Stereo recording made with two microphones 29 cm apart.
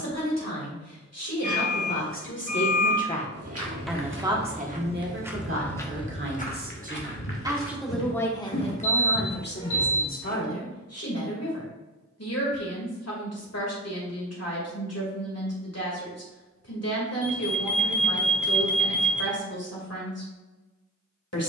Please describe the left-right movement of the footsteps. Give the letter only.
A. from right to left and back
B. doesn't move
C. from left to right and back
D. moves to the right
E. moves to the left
E.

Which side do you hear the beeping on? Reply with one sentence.
In this clip you hear the beeping on the left.